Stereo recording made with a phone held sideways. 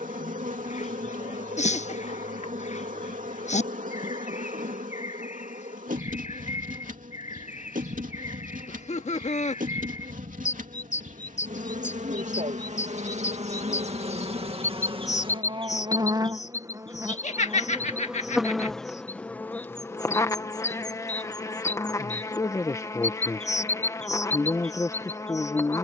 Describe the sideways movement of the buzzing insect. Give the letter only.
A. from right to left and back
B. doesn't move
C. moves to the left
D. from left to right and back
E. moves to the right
C.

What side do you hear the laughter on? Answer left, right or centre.
left.